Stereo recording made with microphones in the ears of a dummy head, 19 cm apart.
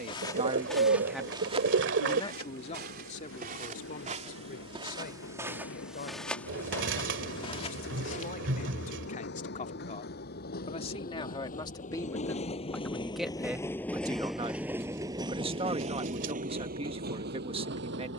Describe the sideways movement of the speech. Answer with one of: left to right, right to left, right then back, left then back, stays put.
left then back.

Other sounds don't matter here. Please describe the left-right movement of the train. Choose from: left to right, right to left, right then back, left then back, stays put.
left to right.